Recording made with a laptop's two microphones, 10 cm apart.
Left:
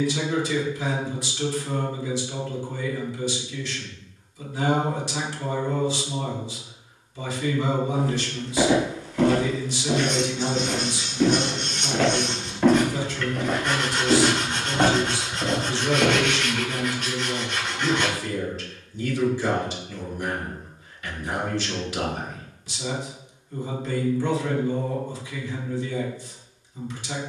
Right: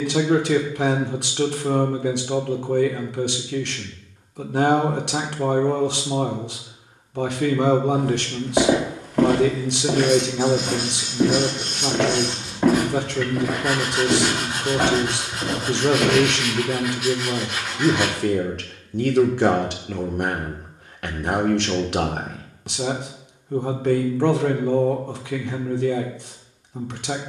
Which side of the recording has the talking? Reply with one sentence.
In this clip you hear the talking on the right.